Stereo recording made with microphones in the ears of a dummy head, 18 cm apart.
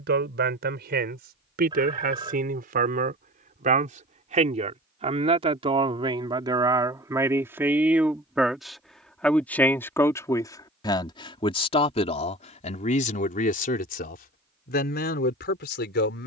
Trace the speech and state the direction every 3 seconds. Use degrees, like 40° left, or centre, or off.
50° right, 30° right, 10° right, 20° left, 40° left, 50° left.